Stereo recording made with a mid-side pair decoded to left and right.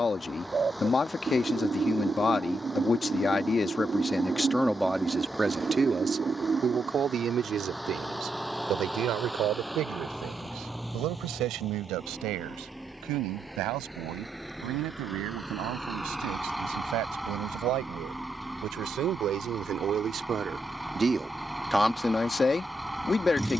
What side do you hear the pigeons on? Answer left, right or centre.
right.